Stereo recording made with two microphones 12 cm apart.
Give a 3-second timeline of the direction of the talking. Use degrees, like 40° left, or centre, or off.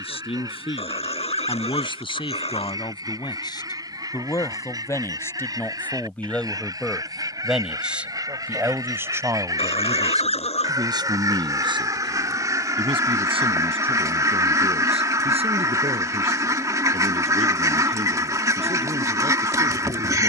50° left, 30° left, centre, 30° right, 50° right, 60° right, 70° right.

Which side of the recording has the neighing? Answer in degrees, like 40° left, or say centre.
70° left.